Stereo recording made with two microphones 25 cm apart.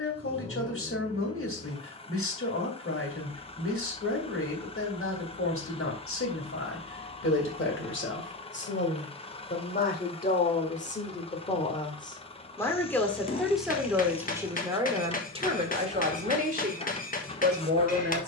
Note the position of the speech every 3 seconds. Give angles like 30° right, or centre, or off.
50° left, 50° left, 50° left, 30° left, centre, 30° right.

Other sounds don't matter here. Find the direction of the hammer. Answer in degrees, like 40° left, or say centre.
30° left.